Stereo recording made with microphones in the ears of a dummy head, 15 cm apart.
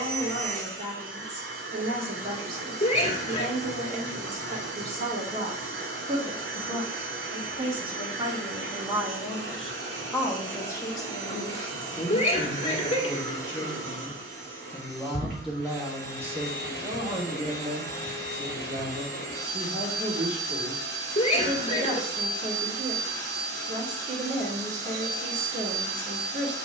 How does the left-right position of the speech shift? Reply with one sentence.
In this clip you hear the speech go left and come back.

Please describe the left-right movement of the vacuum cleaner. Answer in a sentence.
In this clip you hear the vacuum cleaner stay in one place.